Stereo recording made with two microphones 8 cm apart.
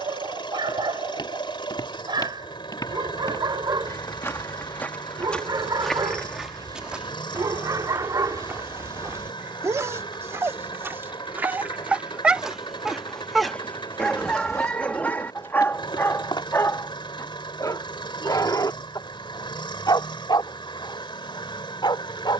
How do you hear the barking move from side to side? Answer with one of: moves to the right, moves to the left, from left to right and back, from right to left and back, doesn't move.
moves to the left.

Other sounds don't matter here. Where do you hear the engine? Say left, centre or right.
left.